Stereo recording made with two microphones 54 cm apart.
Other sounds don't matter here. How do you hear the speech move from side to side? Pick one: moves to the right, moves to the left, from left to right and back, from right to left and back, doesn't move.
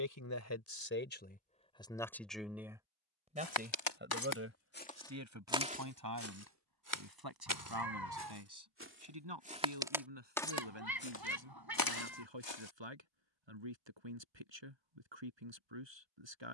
moves to the right.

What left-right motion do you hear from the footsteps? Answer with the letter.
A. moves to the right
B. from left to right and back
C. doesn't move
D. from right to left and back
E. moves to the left
B.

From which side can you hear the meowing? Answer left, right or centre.
right.